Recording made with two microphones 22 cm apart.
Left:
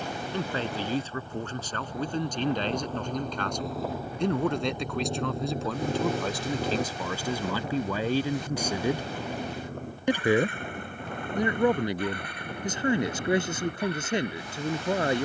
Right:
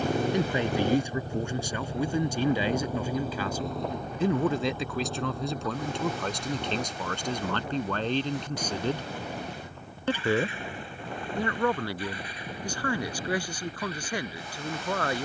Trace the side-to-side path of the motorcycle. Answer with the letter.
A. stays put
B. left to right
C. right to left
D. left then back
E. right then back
C.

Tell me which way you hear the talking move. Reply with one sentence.
In this clip you hear the talking go from the right side to the left.